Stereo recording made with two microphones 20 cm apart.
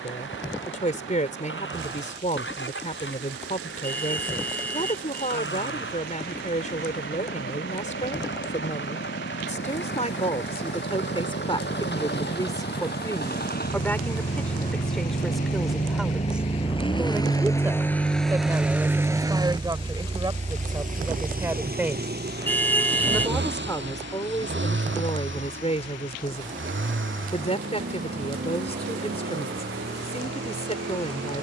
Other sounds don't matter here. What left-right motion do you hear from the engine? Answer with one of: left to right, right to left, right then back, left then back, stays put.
left to right.